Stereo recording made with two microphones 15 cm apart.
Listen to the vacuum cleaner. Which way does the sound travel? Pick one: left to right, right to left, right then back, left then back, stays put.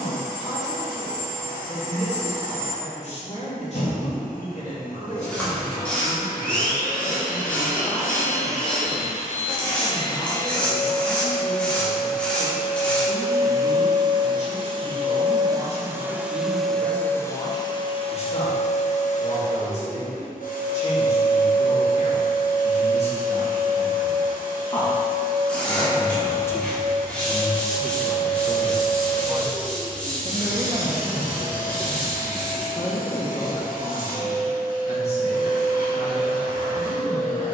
right then back.